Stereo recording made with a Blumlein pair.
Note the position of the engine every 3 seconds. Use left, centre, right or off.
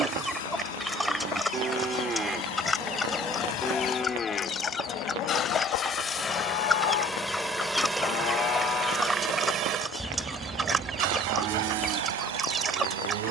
left, left, centre, right, right.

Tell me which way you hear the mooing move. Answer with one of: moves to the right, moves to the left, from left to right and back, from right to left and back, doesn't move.
from right to left and back.